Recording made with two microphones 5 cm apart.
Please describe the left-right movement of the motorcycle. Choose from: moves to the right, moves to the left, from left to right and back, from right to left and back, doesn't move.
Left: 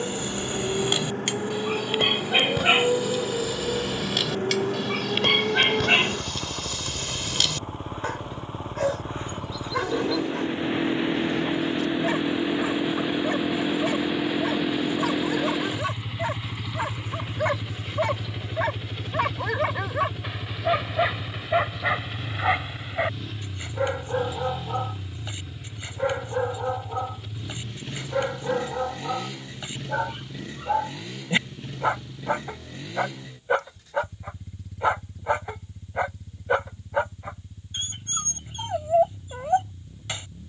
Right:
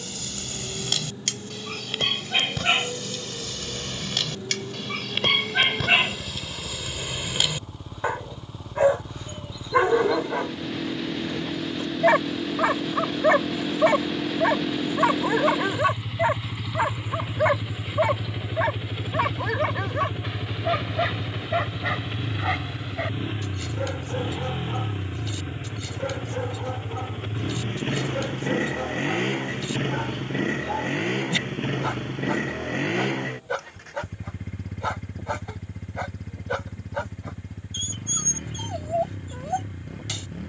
moves to the right.